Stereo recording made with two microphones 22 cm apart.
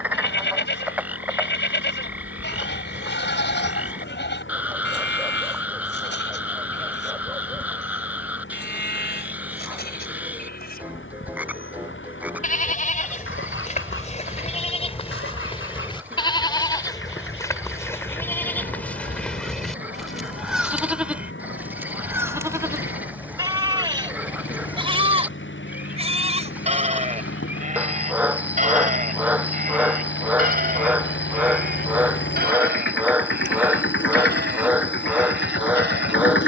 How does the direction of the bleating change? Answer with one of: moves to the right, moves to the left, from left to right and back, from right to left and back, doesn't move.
moves to the right.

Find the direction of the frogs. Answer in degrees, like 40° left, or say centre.
10° right.